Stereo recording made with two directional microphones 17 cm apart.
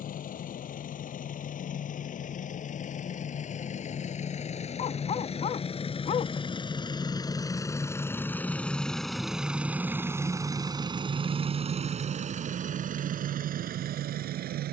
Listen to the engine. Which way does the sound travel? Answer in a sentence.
In this clip you hear the engine move from left to right.